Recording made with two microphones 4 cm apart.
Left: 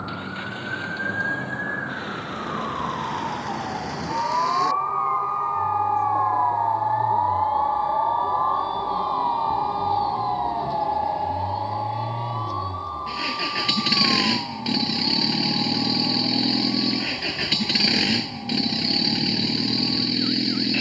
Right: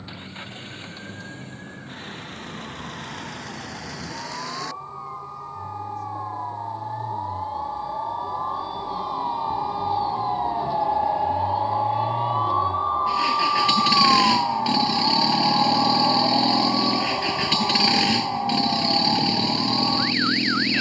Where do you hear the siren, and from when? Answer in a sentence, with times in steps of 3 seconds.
In this clip you hear the siren on the left from 0 s, in the centre from 9 s and on the right from 12 s.